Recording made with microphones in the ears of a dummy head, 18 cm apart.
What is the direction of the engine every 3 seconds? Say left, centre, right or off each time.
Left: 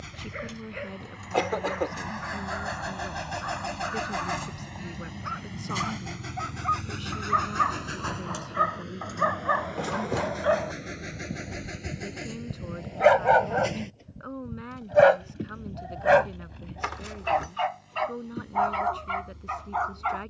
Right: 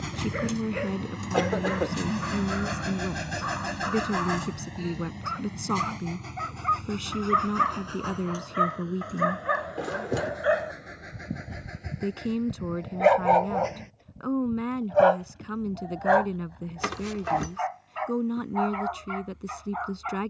right, centre, left, left, left, left, left.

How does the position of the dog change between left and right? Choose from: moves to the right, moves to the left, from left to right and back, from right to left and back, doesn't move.
moves to the left.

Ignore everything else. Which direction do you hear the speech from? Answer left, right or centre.
right.